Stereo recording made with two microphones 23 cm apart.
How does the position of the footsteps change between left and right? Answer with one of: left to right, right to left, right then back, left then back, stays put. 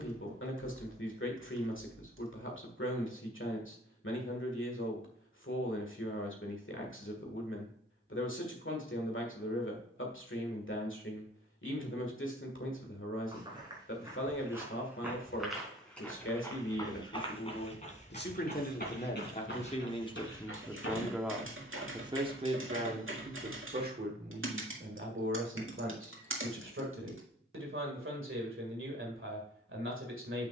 right to left.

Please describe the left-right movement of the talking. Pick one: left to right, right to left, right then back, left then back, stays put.
left to right.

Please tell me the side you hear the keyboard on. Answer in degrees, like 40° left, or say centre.
60° right.